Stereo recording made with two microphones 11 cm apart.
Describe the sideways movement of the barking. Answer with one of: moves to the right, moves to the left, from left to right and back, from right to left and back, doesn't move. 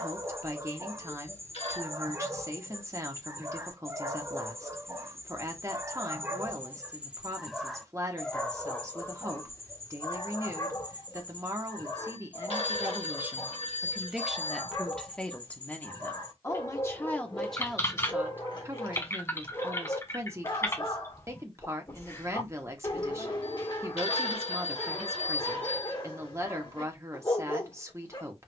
moves to the left.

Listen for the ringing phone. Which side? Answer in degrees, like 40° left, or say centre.
70° left.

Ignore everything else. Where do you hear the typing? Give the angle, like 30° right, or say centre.
20° left.